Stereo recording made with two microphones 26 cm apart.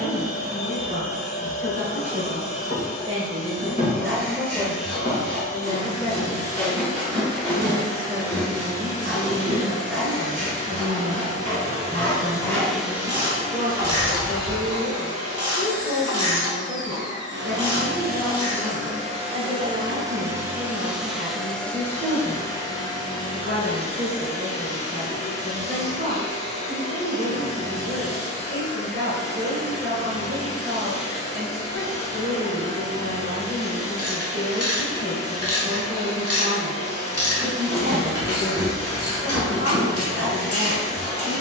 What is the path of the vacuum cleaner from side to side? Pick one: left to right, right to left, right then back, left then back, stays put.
right then back.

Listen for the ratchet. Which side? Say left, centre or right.
left.